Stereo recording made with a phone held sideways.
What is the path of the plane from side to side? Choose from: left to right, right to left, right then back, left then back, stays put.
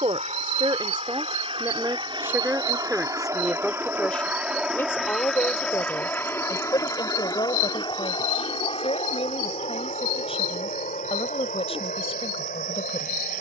right to left.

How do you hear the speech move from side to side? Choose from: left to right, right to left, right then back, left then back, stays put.
right to left.